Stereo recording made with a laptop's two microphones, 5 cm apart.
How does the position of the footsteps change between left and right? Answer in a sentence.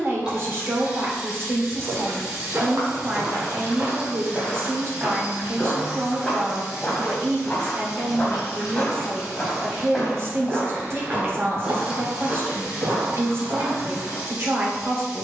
You can hear the footsteps go left and come back.